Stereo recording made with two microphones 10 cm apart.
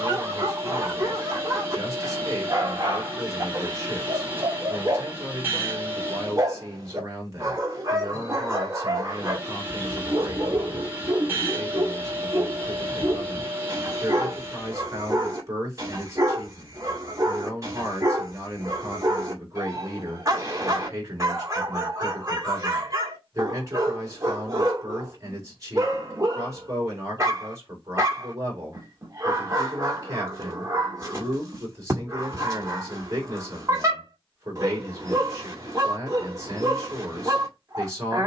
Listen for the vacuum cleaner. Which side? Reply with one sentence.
You can hear the vacuum cleaner on the right.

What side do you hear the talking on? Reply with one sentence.
You can hear the talking on the right.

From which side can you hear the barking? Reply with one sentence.
In this clip you hear the barking on the right.